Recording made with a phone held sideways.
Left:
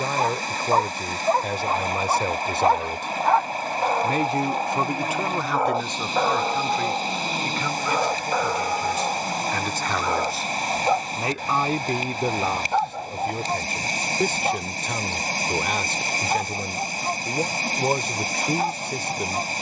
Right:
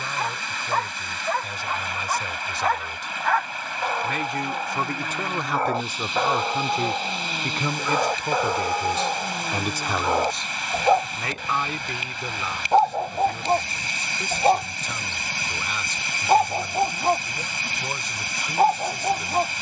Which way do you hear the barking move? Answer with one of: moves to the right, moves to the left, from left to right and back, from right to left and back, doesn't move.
moves to the right.